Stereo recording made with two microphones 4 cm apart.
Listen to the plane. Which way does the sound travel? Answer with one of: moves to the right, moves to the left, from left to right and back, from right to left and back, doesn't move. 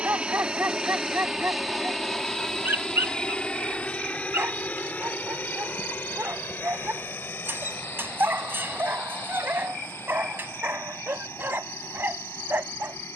moves to the left.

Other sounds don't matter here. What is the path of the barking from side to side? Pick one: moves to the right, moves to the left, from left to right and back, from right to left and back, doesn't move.
doesn't move.